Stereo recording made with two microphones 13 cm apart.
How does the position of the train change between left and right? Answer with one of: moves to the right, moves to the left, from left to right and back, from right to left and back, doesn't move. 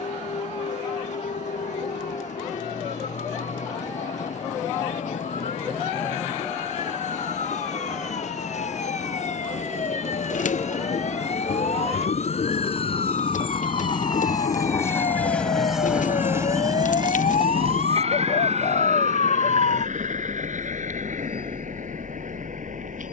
moves to the right.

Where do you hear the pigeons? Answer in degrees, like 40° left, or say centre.
80° left.